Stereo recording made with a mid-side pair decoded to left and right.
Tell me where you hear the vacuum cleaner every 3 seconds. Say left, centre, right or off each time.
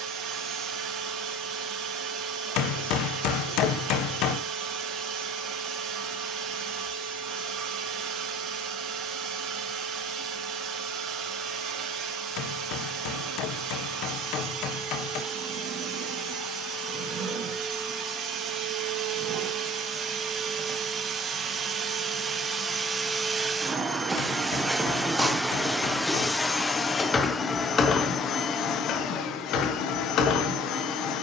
right, right, right, right, right, right, right, right, centre, left, left.